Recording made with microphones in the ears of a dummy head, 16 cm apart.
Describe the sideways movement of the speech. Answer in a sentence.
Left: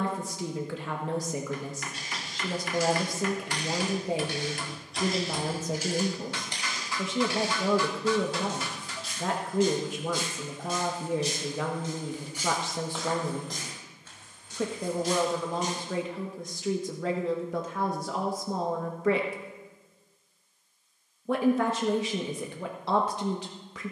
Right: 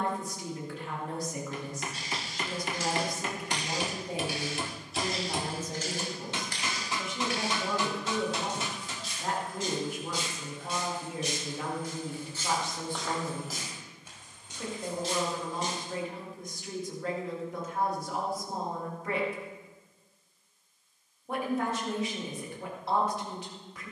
In this clip you hear the speech stay in one place.